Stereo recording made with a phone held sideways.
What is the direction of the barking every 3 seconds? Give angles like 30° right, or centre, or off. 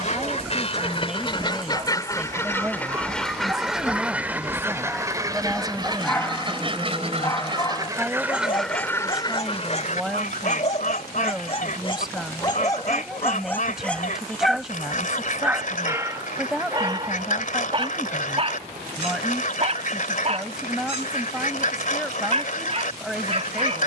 30° right, 10° right, 20° left, 40° left, 10° left, 20° right, 40° right, 40° right.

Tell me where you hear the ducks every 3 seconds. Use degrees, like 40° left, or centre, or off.
30° left, 10° right, 20° right, 50° left, 50° left, 50° left, 50° left, 50° left.